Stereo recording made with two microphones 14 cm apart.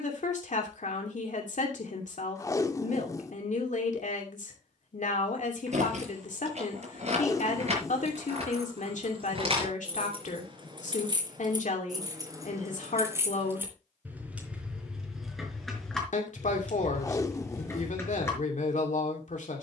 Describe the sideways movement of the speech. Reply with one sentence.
You can hear the speech stay put.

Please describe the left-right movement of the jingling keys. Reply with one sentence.
You can hear the jingling keys go from the right side to the left.